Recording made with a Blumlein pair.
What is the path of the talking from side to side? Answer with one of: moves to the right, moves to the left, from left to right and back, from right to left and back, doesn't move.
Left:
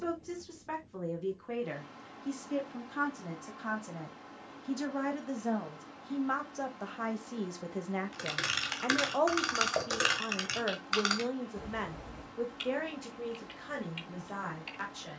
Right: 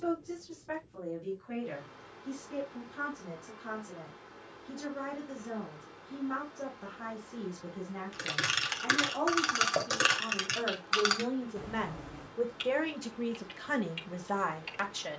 moves to the right.